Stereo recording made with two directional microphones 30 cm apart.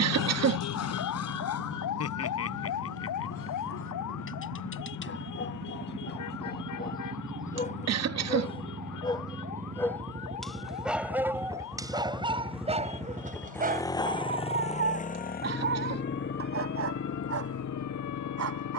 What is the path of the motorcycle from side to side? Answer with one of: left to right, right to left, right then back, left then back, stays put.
right to left.